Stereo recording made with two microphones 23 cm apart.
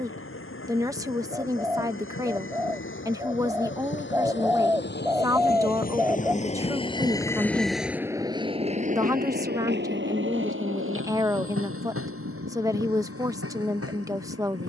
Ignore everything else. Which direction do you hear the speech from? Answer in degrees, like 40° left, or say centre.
10° right.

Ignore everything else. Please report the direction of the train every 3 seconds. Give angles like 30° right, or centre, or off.
70° left, 50° left, centre, 60° right, 80° right.